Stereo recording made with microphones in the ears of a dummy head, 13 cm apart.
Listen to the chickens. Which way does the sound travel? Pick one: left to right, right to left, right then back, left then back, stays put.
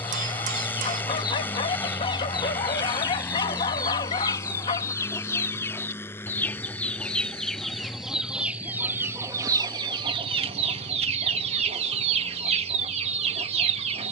left to right.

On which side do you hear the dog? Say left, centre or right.
left.